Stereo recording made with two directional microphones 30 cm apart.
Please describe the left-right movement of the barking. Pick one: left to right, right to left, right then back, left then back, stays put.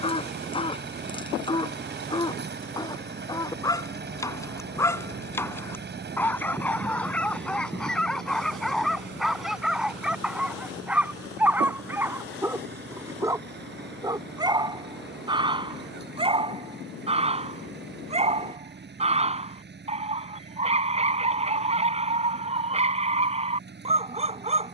left to right.